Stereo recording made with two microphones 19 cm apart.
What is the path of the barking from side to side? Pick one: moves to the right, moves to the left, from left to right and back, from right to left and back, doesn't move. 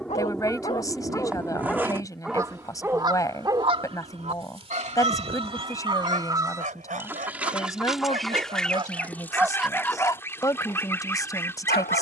from left to right and back.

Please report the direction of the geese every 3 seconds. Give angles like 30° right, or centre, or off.
10° right, 30° right, 10° right, 10° left.